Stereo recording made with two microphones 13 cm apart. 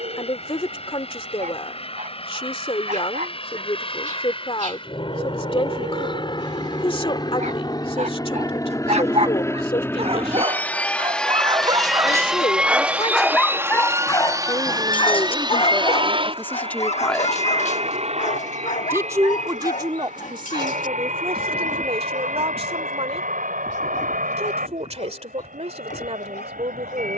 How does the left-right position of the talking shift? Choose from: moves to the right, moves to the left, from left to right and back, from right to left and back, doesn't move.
moves to the right.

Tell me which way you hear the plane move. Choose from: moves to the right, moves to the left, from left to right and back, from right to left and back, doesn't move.
moves to the right.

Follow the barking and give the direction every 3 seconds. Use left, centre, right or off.
right, right, right, right, centre, left, left, left, left.